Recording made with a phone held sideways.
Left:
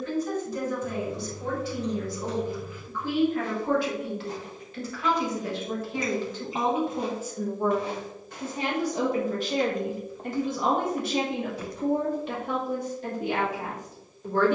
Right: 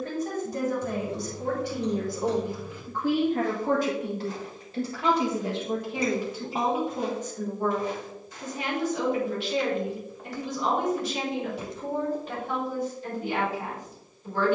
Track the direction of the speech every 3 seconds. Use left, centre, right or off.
right, right, centre, left, left.